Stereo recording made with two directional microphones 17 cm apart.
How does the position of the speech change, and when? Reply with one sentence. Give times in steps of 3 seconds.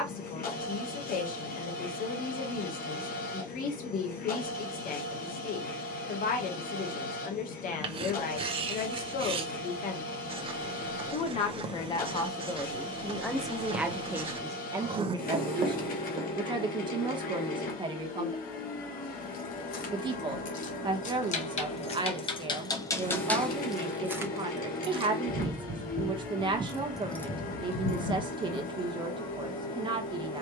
In this clip you hear the speech on the left from 0 s, in the centre from 12 s and on the right from 15 s.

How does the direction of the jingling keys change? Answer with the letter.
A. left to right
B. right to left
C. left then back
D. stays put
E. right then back
E.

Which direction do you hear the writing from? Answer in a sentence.
In this clip you hear the writing on the right.